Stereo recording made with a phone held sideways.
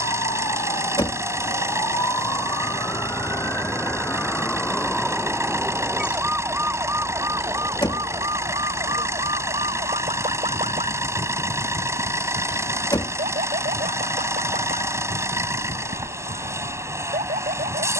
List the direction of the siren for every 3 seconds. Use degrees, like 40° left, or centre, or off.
30° left, 10° left, 20° right, 50° right, 60° right, 70° right.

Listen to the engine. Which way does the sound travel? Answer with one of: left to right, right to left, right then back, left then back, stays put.
stays put.